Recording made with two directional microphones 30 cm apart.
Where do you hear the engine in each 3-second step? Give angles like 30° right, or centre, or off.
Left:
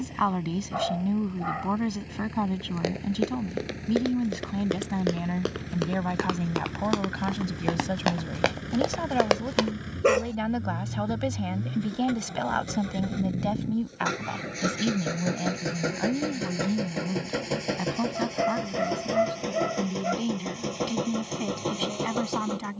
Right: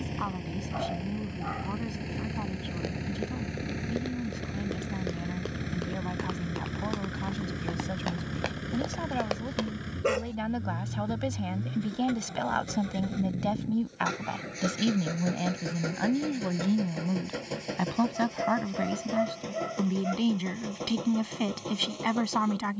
50° right, 40° right, 20° right, centre, 20° left, 40° left, 50° left, 50° left.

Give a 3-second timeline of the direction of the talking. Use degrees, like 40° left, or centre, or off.
60° left, 60° left, 40° left, 20° left, centre, 20° right, 30° right, 30° right.